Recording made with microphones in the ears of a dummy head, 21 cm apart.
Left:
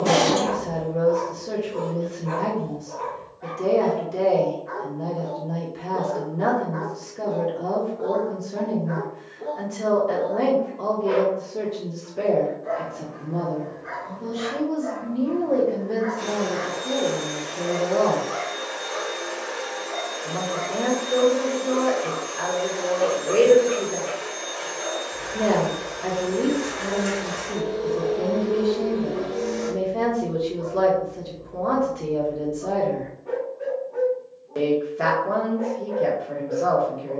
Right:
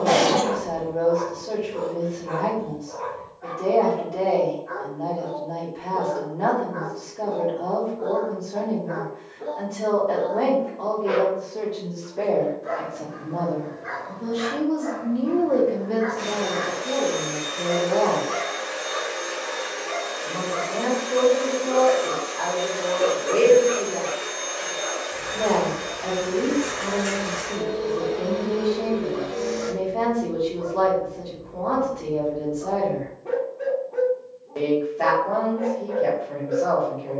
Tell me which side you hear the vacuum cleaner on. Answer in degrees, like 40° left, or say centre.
10° right.